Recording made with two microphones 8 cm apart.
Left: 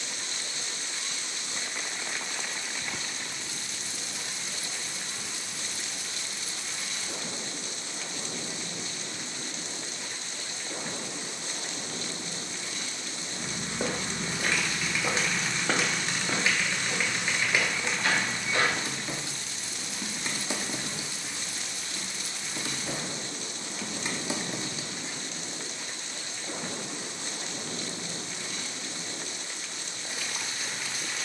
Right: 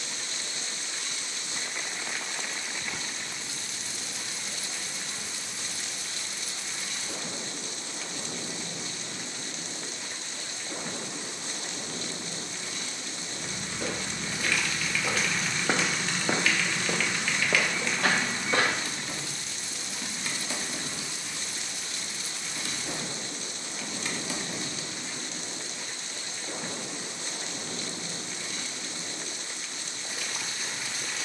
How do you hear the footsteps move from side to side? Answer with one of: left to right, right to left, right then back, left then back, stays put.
left to right.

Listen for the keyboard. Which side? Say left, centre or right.
left.